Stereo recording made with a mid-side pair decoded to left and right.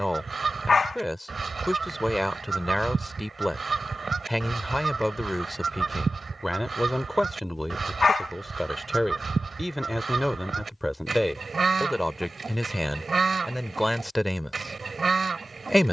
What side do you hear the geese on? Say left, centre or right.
right.